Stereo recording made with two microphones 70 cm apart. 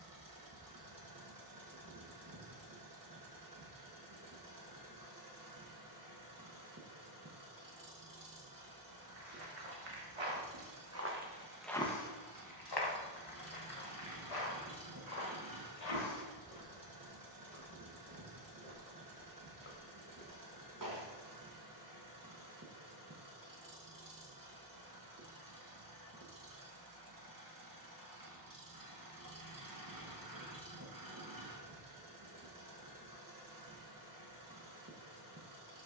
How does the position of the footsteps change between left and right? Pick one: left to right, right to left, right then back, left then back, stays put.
left then back.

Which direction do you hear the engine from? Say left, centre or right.
right.